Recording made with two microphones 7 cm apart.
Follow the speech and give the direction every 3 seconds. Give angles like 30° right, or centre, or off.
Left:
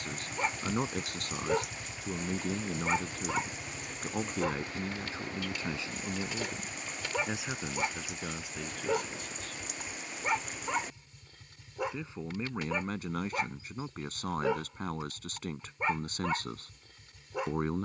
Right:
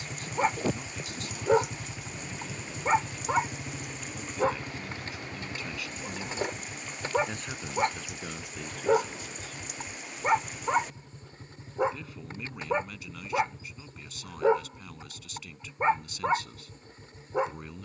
50° left, 40° left, 10° left, centre, 40° left, 40° left.